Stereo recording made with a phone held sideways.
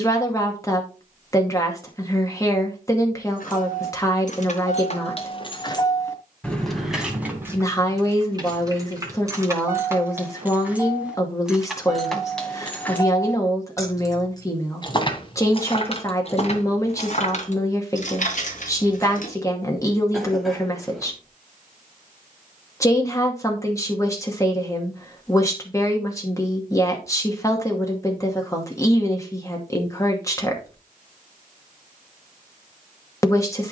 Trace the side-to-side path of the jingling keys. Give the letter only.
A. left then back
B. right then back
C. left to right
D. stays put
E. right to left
B.